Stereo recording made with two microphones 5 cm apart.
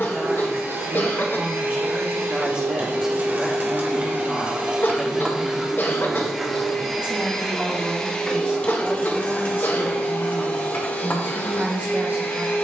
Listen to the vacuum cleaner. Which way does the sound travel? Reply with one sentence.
You can hear the vacuum cleaner move from right to left.